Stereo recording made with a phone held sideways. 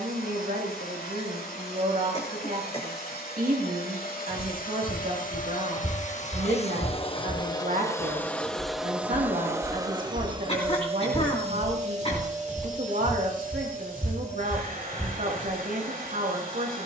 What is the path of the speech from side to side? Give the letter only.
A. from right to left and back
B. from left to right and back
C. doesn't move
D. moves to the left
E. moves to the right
C.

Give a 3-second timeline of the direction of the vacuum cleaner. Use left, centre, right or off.
left, left, left, right, right, right.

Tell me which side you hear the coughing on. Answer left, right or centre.
left.